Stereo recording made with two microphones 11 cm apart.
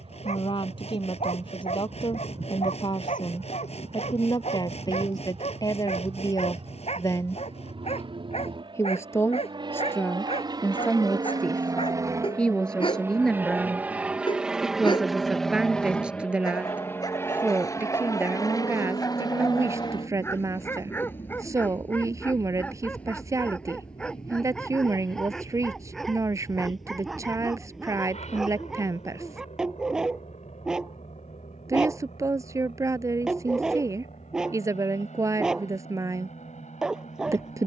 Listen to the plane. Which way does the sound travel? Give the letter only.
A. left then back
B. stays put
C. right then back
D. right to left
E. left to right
D.